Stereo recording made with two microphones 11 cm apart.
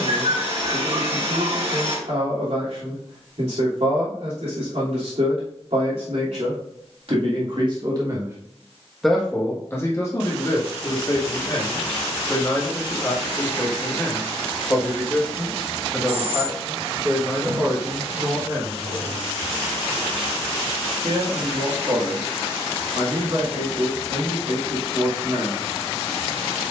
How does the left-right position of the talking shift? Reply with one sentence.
In this clip you hear the talking go left and come back.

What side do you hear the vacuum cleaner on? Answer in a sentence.
You can hear the vacuum cleaner on the right.